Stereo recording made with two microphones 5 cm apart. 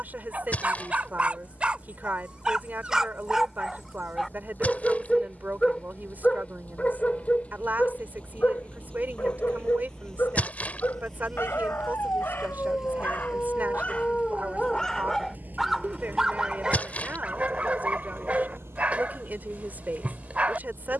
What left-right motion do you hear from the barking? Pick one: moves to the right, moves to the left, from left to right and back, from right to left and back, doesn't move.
from right to left and back.